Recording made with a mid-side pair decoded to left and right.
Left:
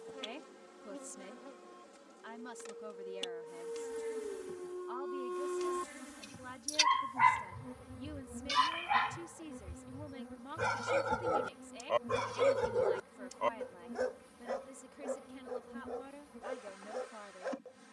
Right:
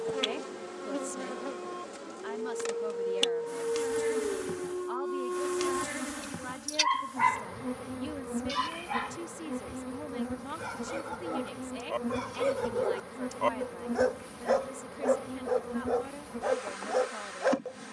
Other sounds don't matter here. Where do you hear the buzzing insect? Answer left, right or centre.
right.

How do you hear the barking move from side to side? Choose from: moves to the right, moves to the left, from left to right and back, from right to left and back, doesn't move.
from right to left and back.